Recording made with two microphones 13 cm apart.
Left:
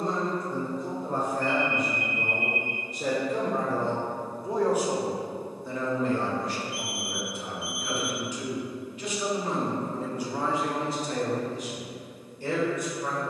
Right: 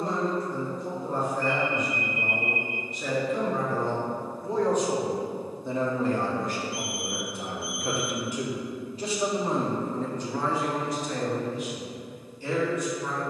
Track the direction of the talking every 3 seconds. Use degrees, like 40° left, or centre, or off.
50° left, 10° left, 50° right, 10° left, 50° left.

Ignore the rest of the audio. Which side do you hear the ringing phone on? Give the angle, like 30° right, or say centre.
40° right.